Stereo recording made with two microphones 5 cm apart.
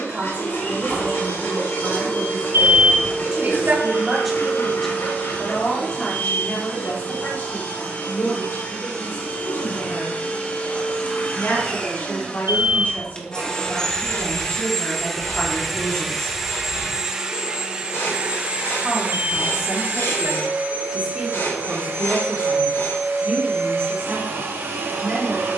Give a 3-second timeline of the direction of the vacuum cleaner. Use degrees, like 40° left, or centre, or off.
60° left, 50° left, 40° left, 30° left, 20° left, 10° right, 40° right, 60° right, 70° right.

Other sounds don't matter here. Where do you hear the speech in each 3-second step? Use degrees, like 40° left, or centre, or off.
30° right, centre, 50° left, 60° left, 40° left, 20° left, 10° right, 30° right, 30° right.